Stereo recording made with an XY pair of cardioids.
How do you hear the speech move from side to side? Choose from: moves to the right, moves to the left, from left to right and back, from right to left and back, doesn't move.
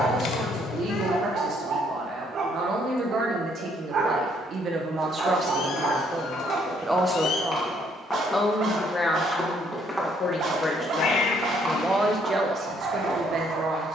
from right to left and back.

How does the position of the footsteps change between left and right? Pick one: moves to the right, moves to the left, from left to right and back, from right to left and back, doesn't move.
moves to the right.